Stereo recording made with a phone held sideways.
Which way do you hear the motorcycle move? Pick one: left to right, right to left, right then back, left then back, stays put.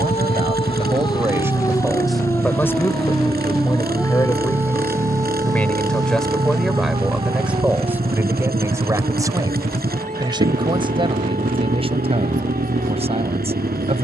stays put.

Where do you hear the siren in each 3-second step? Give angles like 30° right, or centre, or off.
20° left, 10° right, 30° right, 50° right, 50° right.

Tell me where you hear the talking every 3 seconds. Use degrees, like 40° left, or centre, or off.
10° right, 20° left, 10° right, 30° right, 40° right.